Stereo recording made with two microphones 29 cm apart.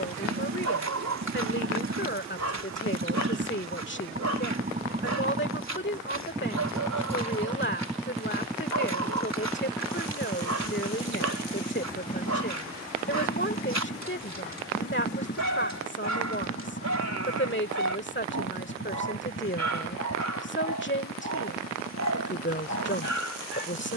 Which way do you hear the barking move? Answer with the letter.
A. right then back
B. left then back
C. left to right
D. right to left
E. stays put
E.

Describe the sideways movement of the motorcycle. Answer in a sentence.
You can hear the motorcycle go from the right side to the left.